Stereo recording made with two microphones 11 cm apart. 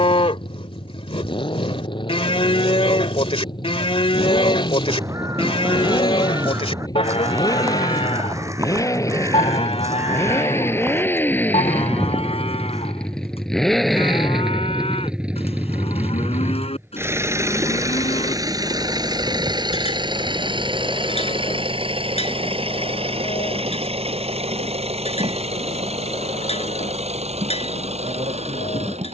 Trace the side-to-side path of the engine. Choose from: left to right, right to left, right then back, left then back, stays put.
left to right.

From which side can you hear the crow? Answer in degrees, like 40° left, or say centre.
30° right.